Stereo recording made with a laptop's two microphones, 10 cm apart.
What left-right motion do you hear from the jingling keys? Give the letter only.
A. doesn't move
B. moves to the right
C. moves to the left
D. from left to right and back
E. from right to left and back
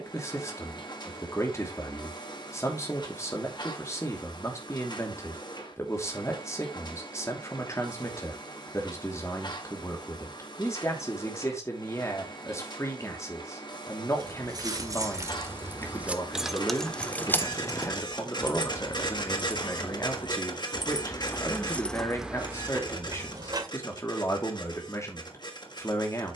E.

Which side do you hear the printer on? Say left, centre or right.
left.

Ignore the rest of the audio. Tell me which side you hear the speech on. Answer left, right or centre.
left.